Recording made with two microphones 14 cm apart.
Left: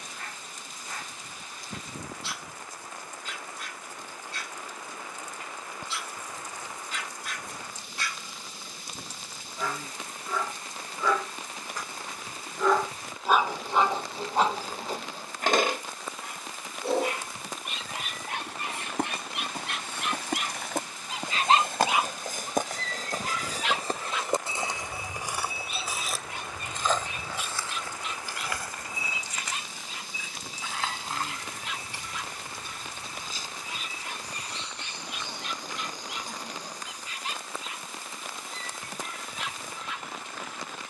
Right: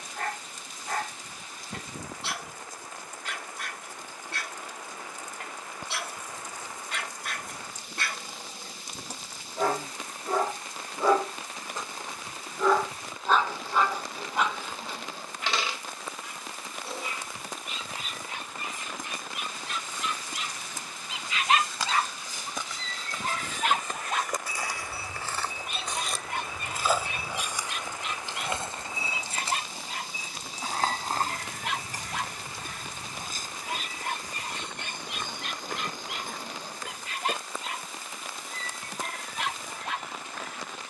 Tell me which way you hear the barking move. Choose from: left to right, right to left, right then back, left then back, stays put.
left then back.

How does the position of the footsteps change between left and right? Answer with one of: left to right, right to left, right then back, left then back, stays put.
left to right.